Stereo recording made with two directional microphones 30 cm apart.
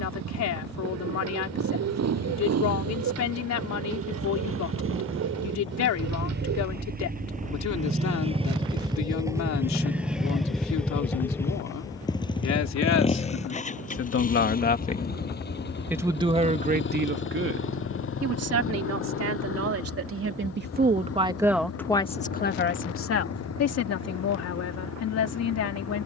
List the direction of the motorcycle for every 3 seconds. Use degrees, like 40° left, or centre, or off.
60° right, 50° right, 30° right, centre, 20° left, 40° left, 50° left, 50° left, 60° left.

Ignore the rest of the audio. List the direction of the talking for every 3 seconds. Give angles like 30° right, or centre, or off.
60° left, 60° left, 60° left, 60° left, 50° left, 20° right, 50° right, 30° left, 60° left.